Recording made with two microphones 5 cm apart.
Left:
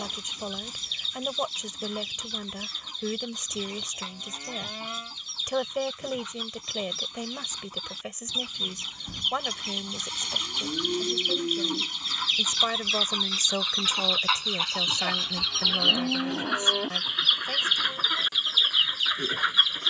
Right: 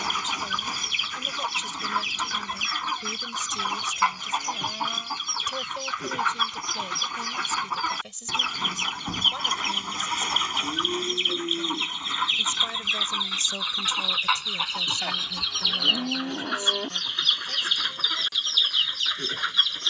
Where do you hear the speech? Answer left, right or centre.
left.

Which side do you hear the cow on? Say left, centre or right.
centre.